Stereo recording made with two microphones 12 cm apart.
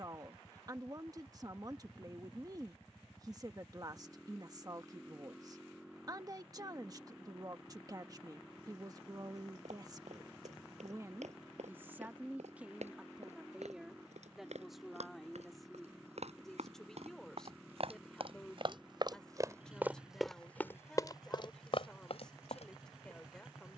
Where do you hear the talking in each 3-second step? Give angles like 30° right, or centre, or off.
30° right, 30° right, 30° right, 30° right, 10° right, centre, 10° left, 10° left.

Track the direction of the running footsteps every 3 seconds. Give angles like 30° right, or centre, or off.
off, off, off, 80° right, 70° right, 60° right, 20° right, 50° left.